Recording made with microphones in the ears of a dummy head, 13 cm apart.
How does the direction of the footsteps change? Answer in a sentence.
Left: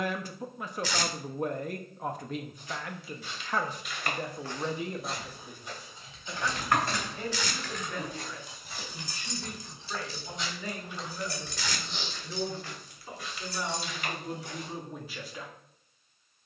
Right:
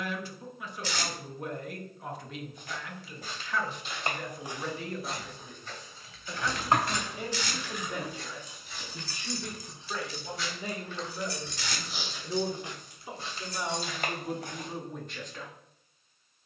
In this clip you hear the footsteps go left and come back.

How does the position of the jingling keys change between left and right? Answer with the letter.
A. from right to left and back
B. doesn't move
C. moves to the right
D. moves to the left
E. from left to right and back
D.